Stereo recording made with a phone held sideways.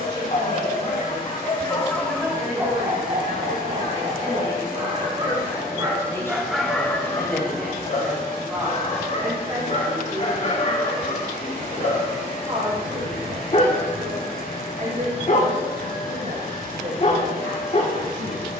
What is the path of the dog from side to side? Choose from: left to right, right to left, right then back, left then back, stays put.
right then back.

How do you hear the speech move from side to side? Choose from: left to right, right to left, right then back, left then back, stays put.
left to right.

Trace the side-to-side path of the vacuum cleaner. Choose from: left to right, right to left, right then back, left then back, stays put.
stays put.